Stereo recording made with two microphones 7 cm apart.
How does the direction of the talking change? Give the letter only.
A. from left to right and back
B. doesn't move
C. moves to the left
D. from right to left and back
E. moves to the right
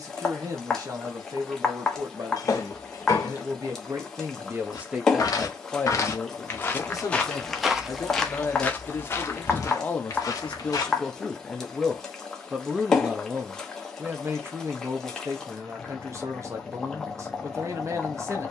D.